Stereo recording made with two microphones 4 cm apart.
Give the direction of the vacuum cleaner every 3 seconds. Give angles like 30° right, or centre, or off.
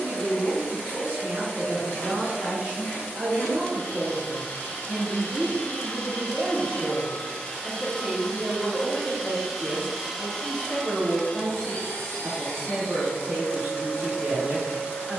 60° left, 50° left, 30° left, 20° left, 50° left.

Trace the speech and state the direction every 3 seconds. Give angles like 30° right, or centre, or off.
50° right, 30° right, 10° right, 10° right, 50° right.